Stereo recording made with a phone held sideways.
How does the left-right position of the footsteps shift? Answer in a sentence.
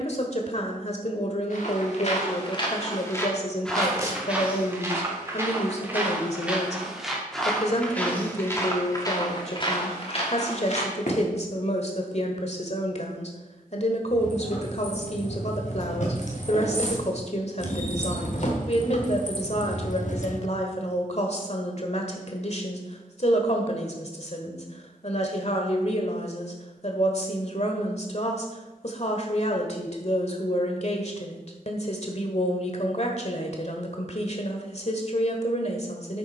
In this clip you hear the footsteps go right and come back.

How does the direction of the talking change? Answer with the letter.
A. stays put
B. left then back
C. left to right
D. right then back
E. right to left
A.